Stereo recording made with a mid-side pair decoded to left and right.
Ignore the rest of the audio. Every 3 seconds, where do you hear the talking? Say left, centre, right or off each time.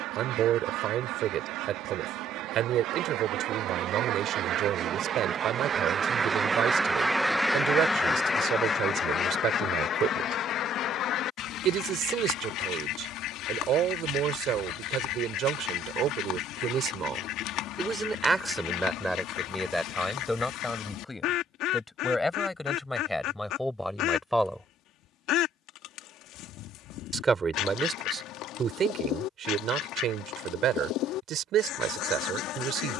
right, right, right, right, right, right, centre, centre, centre, right, right.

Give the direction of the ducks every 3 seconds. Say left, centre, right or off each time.
right, right, centre, left, left, left, left, left, left, left, left.